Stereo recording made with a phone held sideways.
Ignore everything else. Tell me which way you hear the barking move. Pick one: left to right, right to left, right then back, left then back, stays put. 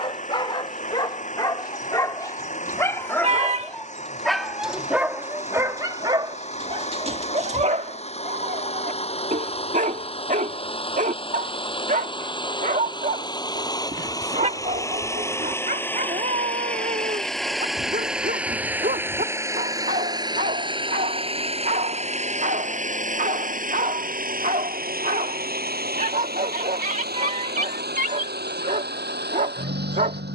left to right.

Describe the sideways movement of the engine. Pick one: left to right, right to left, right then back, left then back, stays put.
left to right.